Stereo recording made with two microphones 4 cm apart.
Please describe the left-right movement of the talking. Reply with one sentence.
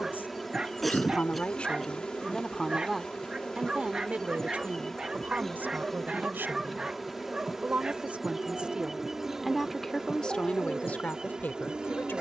You can hear the talking go right and come back.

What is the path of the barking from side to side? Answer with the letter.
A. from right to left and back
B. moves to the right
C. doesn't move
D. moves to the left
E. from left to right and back
C.